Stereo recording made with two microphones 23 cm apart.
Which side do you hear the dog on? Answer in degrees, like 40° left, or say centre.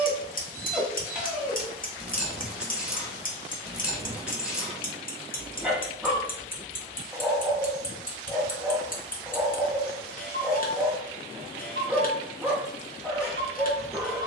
centre.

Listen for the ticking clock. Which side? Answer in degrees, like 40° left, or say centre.
40° left.